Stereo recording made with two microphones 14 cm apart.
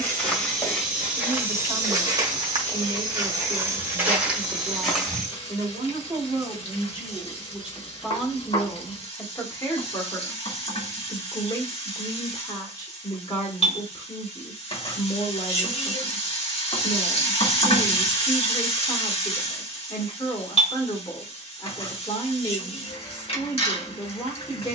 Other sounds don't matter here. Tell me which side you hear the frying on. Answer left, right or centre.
left.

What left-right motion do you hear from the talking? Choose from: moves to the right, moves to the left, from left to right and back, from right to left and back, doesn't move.
moves to the left.